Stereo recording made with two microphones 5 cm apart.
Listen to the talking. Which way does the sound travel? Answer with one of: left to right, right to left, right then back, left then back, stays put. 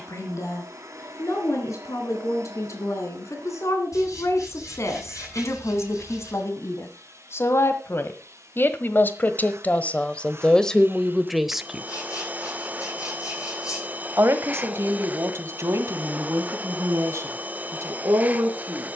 left to right.